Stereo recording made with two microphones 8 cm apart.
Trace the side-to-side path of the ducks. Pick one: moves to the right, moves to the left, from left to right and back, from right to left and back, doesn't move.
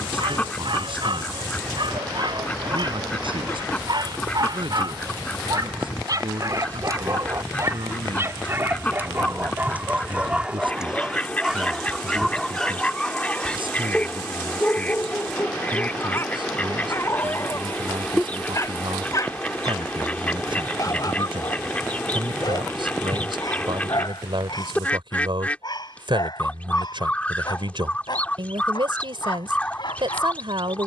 doesn't move.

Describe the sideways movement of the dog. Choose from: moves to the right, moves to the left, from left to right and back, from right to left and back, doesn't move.
moves to the left.